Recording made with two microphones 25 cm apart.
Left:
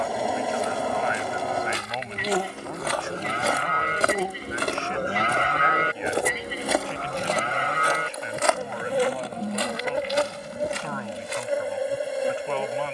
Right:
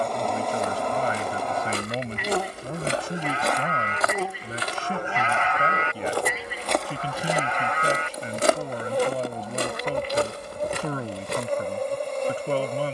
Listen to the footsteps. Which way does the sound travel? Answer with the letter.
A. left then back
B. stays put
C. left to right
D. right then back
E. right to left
A.